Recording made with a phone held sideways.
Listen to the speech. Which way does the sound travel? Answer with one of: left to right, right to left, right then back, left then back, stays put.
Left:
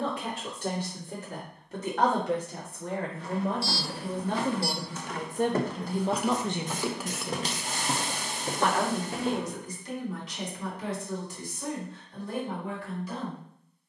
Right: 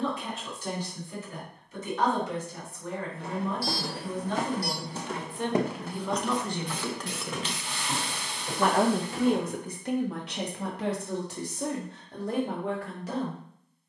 left to right.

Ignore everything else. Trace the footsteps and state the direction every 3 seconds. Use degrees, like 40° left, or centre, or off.
off, 40° right, 40° left, 60° left, off.